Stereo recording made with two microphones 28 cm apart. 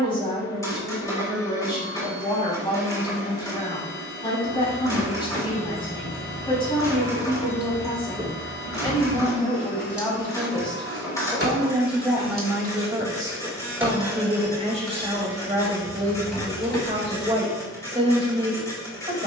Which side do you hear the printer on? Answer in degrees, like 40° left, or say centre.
10° left.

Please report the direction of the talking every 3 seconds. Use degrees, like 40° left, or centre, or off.
20° left, 20° left, 20° left, centre, 20° right, 20° right, 20° right.